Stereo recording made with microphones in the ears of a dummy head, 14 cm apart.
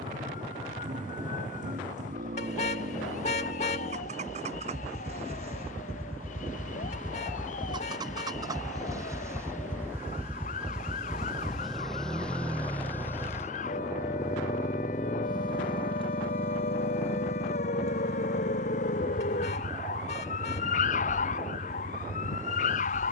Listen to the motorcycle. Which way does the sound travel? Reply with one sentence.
You can hear the motorcycle go from the right side to the left.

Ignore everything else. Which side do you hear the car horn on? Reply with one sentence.
In this clip you hear the car horn on the left.